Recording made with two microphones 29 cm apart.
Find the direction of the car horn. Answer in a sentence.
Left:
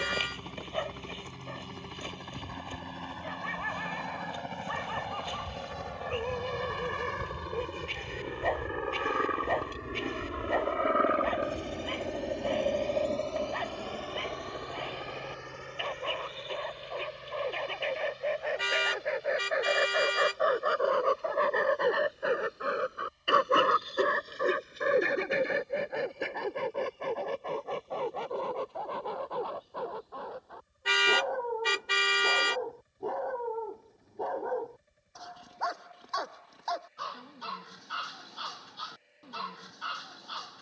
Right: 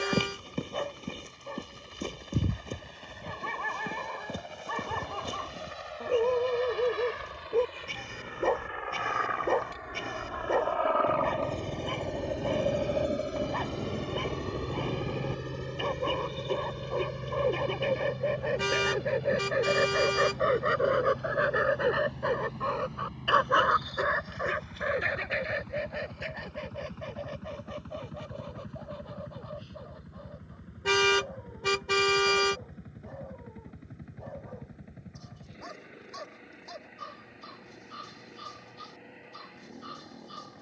You can hear the car horn on the right.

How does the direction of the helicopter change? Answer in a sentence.
You can hear the helicopter move to the right.